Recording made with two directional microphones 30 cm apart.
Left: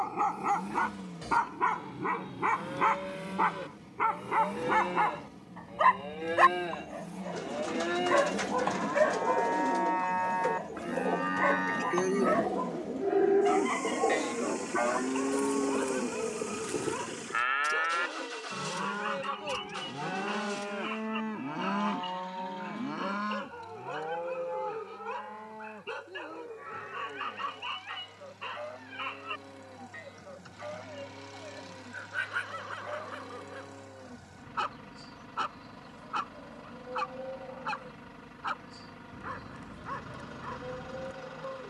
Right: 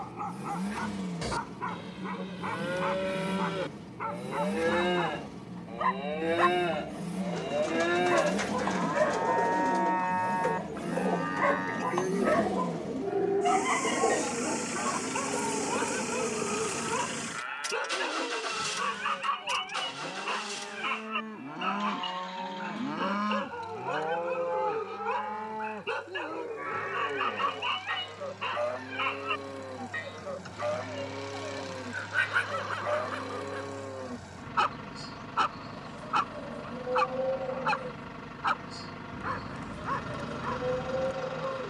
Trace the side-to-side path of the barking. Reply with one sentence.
In this clip you hear the barking go from the left side to the right.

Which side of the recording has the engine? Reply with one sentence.
You can hear the engine on the right.